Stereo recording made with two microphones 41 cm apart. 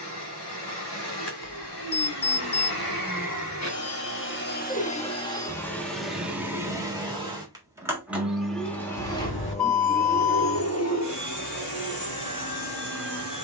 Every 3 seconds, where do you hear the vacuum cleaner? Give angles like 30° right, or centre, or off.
70° left, 20° left, centre, 30° left, 70° left.